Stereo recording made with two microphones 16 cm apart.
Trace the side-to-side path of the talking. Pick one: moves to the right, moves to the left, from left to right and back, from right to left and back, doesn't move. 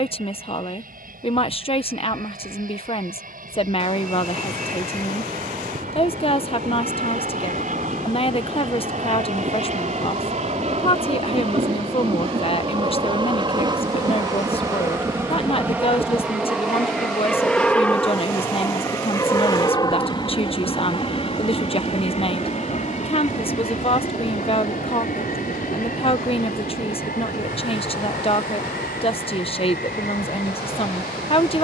doesn't move.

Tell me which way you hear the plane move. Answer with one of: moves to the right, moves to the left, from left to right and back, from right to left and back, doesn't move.
moves to the left.